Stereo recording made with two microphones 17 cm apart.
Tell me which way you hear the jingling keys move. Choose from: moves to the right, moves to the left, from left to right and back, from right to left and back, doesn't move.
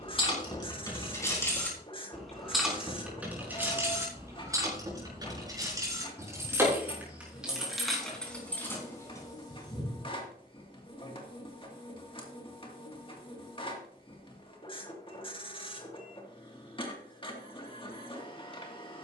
from left to right and back.